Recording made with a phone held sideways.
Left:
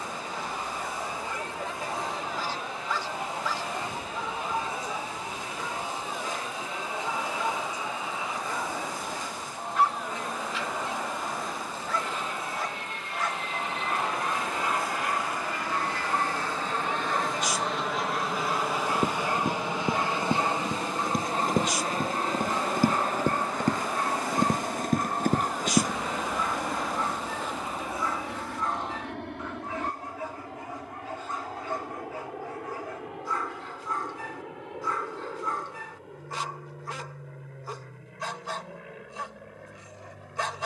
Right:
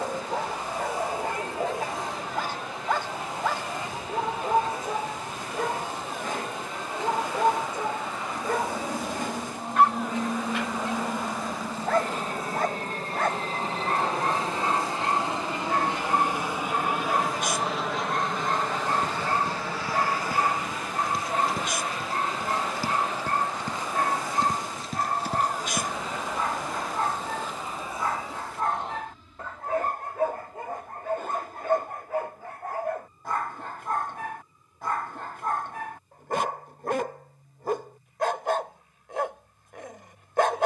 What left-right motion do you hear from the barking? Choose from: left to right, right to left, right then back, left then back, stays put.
stays put.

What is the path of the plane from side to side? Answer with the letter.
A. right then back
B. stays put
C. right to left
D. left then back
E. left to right
C.